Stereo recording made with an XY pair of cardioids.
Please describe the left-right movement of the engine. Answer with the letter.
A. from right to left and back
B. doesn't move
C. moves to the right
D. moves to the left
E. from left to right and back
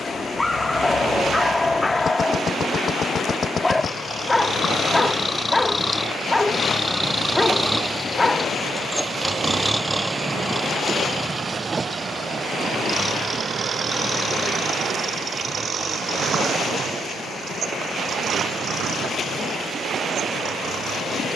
C.